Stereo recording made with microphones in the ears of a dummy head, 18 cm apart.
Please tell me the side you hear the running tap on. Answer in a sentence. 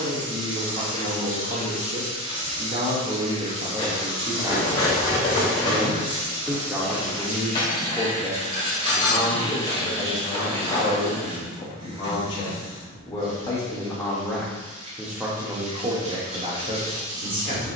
In this clip you hear the running tap on the right.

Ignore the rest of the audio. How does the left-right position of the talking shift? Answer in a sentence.
In this clip you hear the talking go left and come back.